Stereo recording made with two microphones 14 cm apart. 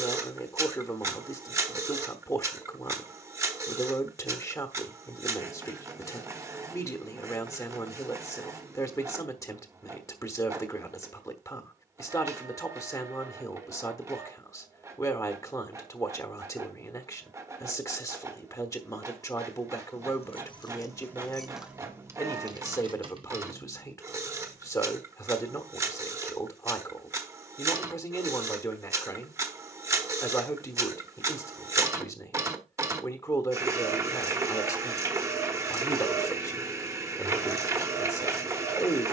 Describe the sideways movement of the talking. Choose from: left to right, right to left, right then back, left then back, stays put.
stays put.